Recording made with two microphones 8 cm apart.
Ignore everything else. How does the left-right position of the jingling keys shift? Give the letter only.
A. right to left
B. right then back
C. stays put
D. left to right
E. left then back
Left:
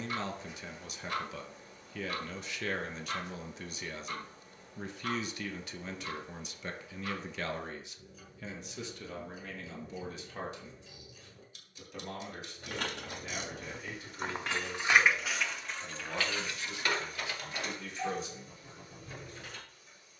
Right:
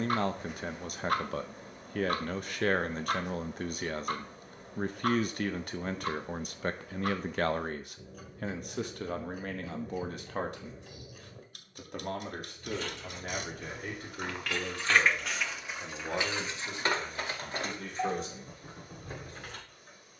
D.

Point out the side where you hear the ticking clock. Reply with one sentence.
You can hear the ticking clock on the right.